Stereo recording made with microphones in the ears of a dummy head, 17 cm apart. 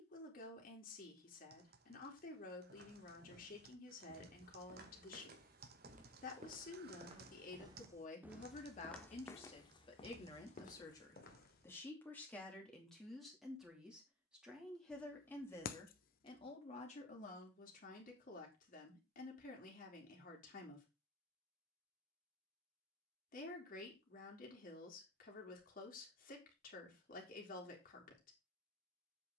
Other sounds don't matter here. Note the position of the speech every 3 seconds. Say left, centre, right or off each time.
left, left, left, left, centre, left, left, left, left, left.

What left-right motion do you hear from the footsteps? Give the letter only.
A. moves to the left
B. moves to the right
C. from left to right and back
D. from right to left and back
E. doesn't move
A.